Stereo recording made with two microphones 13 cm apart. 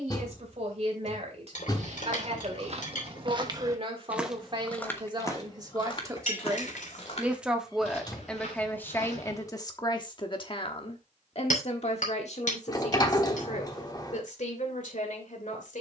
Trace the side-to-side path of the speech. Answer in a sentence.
In this clip you hear the speech move from right to left.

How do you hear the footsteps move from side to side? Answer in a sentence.
In this clip you hear the footsteps travel towards the left.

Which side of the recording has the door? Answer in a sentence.
You can hear the door on the left.